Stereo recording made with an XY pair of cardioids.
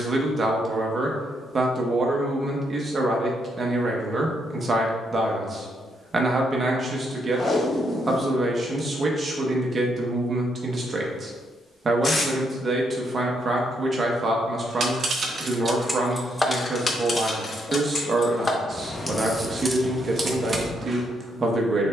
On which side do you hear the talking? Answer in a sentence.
You can hear the talking on the right.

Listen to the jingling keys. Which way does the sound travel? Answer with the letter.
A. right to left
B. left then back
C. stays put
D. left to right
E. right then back
B.